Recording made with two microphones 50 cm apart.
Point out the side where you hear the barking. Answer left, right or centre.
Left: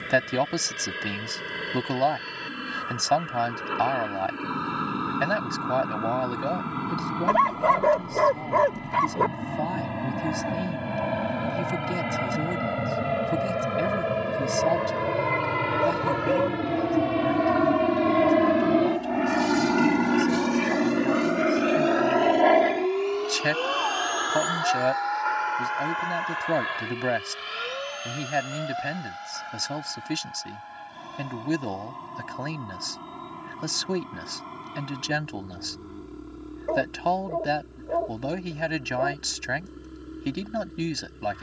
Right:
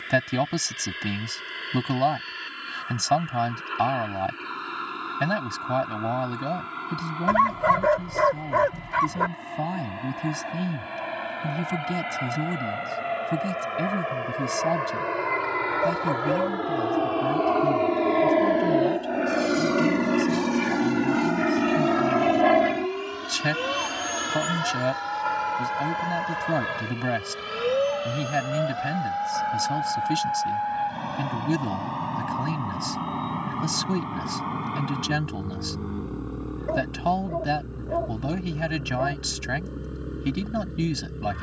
right.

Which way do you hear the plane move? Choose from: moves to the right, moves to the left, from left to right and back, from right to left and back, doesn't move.
moves to the right.